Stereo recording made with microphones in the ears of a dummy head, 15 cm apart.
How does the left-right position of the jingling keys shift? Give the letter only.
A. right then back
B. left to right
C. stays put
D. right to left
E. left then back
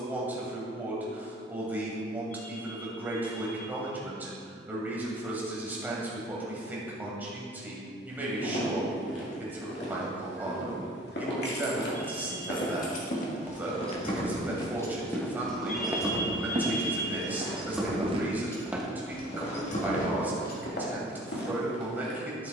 A.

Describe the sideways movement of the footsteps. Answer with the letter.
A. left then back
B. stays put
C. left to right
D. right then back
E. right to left
D.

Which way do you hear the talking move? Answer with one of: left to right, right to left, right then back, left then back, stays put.
stays put.